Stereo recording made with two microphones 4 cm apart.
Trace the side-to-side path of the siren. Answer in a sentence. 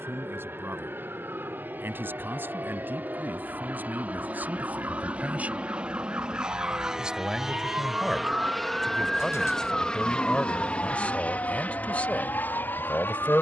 In this clip you hear the siren travel towards the left.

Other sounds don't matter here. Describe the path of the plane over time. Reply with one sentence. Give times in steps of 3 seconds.
In this clip you hear the plane on the right from 0 s, in the centre from 6 s and on the left from 9 s.